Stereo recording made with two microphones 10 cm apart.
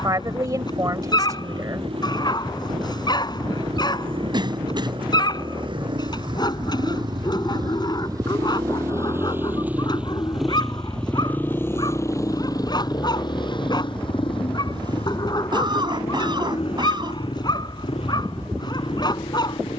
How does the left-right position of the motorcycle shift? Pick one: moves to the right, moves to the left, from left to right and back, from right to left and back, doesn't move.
moves to the left.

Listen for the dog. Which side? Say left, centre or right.
left.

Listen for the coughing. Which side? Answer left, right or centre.
right.